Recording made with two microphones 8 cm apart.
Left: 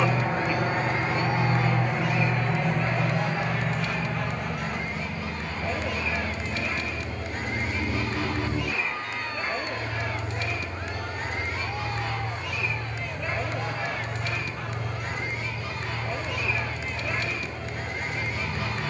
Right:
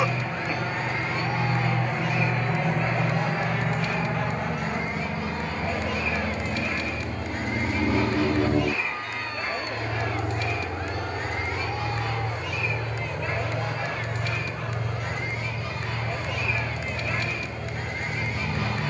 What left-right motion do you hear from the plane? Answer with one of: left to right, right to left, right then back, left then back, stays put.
left to right.